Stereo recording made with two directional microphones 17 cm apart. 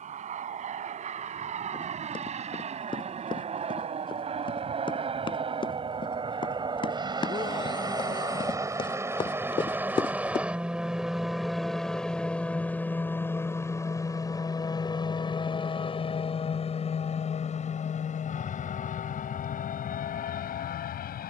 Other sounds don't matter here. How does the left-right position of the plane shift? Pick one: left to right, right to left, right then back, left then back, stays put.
right to left.